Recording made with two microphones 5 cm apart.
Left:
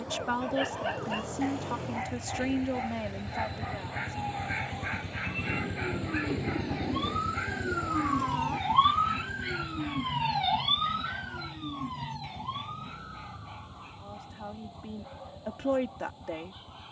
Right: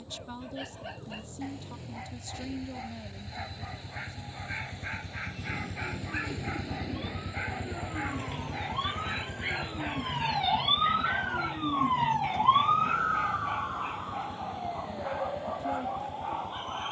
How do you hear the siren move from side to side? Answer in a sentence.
In this clip you hear the siren go from the left side to the right.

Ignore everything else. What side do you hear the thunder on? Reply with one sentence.
You can hear the thunder on the left.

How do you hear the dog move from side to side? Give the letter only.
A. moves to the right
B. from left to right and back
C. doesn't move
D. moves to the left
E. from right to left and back
A.